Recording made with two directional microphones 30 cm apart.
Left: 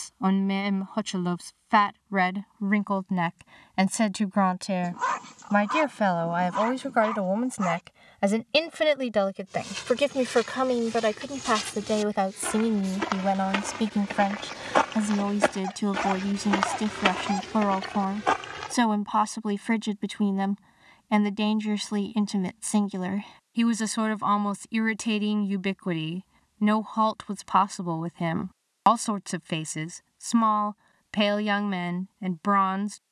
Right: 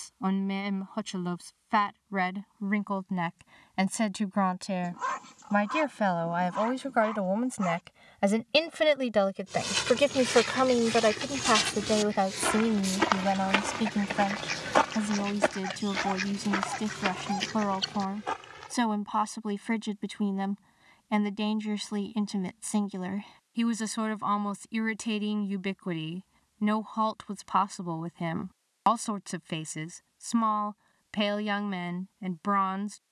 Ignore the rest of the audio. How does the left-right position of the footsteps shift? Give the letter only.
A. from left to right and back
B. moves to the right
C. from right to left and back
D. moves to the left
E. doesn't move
D.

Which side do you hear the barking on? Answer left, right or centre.
left.